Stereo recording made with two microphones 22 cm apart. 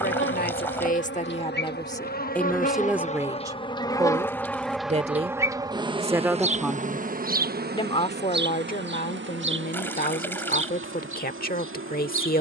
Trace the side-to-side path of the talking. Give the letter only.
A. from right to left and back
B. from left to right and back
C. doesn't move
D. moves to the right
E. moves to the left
B.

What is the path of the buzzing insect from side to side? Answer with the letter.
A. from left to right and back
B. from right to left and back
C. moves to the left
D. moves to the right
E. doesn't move
D.